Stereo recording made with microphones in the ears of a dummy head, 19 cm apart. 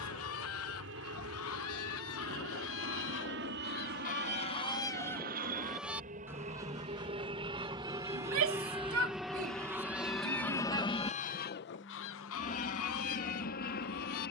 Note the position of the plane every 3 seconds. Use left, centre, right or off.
right, right, right, centre, left.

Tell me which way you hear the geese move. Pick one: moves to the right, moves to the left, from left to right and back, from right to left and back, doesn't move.
from left to right and back.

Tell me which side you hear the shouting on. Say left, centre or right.
right.